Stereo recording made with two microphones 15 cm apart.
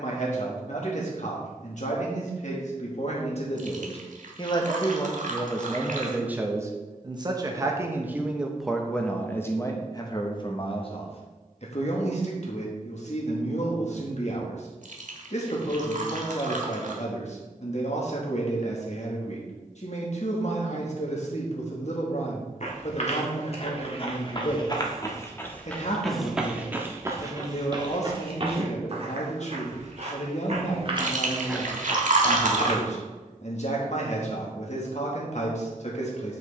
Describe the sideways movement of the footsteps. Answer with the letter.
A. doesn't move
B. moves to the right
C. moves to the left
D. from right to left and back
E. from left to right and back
E.